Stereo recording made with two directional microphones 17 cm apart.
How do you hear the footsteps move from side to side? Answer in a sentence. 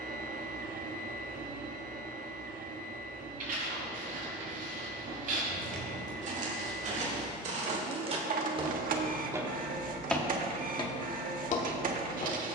In this clip you hear the footsteps move from right to left.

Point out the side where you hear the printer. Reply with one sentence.
In this clip you hear the printer on the right.